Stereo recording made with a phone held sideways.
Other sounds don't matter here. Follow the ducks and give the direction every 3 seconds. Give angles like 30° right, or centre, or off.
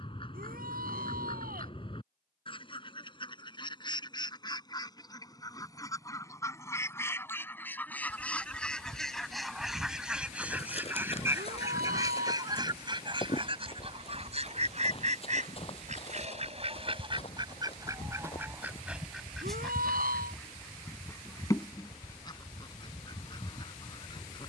30° left, 30° left, 10° left, 10° right, 40° right, 40° right, centre, 30° left.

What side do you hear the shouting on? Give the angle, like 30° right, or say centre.
70° right.